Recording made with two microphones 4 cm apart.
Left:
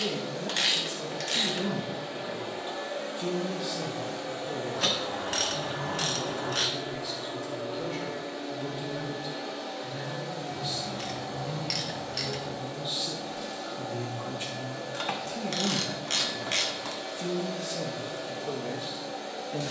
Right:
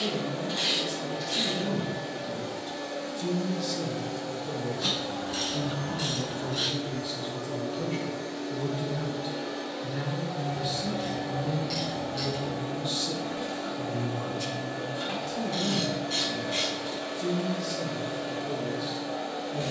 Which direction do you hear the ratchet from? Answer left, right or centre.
left.